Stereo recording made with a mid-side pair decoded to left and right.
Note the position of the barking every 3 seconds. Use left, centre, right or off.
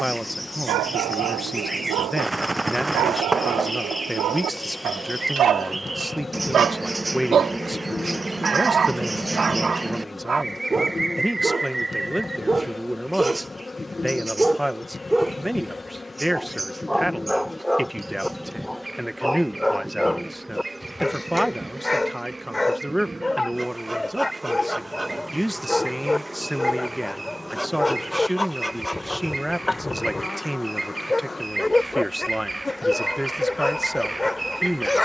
right, right, right, right, centre, centre, centre, centre, centre, centre, centre, centre.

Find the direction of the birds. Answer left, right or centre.
centre.